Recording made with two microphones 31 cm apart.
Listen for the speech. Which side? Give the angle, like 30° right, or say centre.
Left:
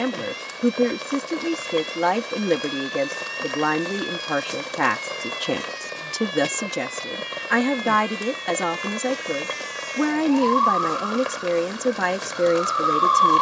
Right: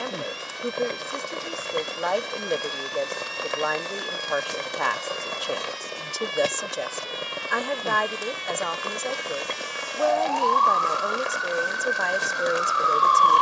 70° left.